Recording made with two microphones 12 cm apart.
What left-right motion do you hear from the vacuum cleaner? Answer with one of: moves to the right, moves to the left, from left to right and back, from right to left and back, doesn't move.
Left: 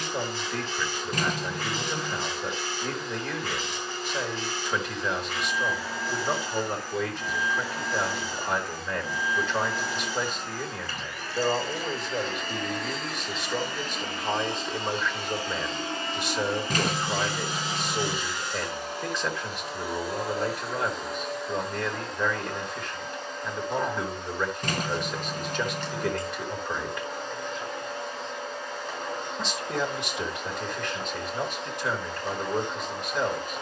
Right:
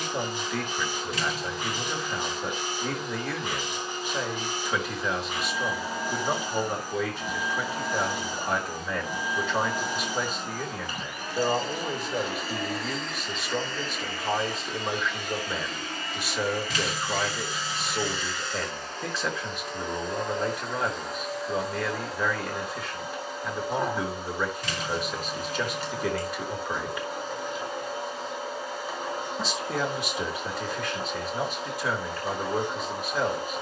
from right to left and back.